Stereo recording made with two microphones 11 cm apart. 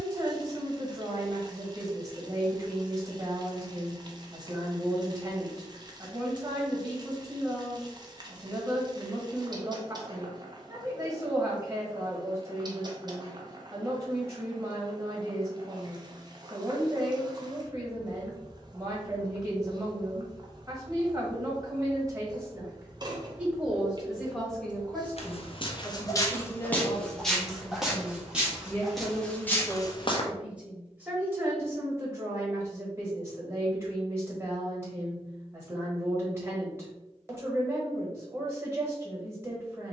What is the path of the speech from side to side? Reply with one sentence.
You can hear the speech move from right to left and back again.